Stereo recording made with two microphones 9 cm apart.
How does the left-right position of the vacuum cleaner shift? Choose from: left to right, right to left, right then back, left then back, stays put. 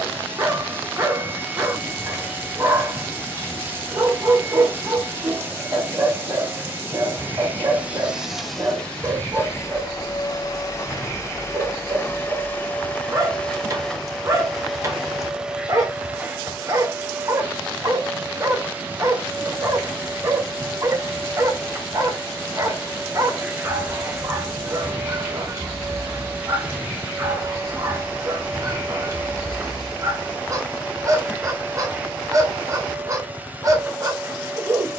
left then back.